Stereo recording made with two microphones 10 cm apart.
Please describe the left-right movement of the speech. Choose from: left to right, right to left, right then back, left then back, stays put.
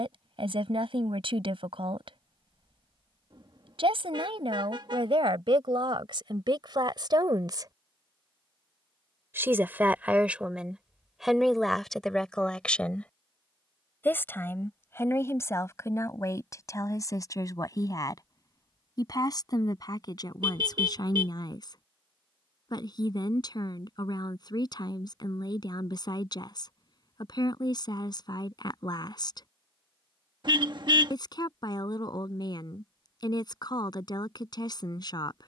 right to left.